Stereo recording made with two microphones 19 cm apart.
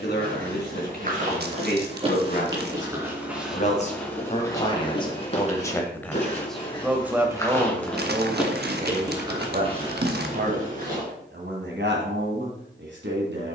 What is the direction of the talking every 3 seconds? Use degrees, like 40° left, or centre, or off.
50° left, 30° left, 20° right, 50° right, 70° right.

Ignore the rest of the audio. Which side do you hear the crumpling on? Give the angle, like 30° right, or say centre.
60° right.